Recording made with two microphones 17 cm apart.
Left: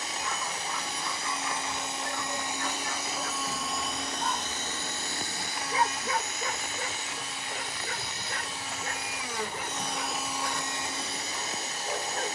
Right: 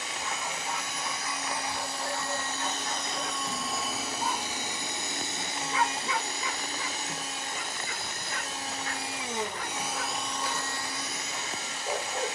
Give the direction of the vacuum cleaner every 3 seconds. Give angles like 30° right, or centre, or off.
20° left, 10° right, 40° right, 10° left.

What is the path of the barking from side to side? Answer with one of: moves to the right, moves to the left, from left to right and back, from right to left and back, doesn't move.
from right to left and back.